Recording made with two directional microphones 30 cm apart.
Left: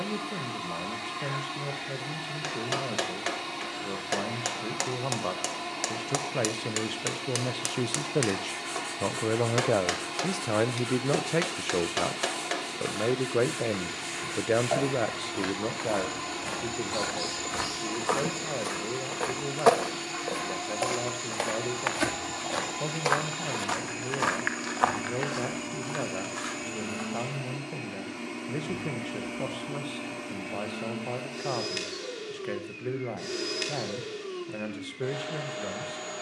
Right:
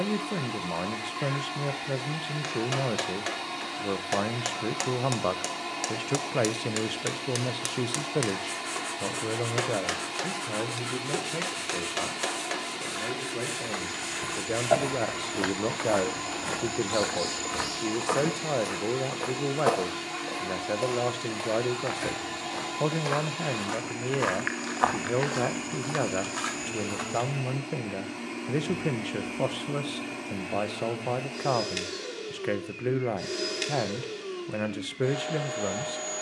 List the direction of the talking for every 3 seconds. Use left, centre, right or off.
right, right, centre, left, left, right, right, right, right, right, right, right.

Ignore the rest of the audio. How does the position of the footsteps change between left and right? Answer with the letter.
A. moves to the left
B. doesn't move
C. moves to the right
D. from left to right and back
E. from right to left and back
E.